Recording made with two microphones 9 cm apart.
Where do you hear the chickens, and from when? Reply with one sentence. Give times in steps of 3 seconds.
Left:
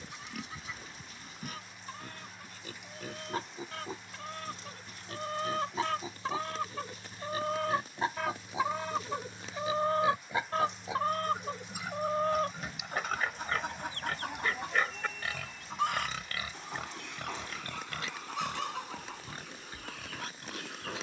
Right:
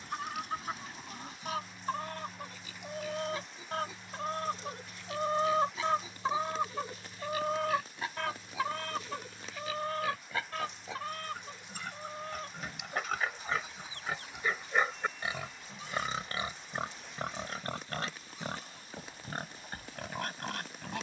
In this clip you hear the chickens on the right from 0 s, in the centre from 6 s and on the left from 9 s.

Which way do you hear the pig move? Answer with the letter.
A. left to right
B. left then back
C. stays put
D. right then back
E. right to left
A.